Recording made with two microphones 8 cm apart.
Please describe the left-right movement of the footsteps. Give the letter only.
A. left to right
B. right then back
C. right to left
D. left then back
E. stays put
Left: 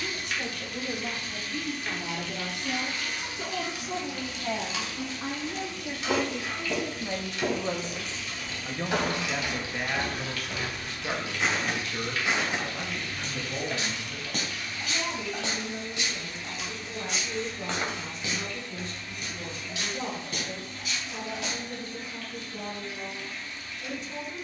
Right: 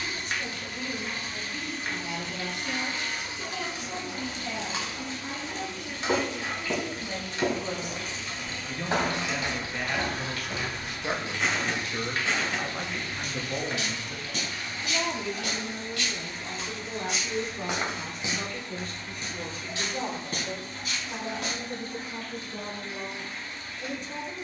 D.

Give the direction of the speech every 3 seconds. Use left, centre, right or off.
left, left, left, centre, right, right, right, right.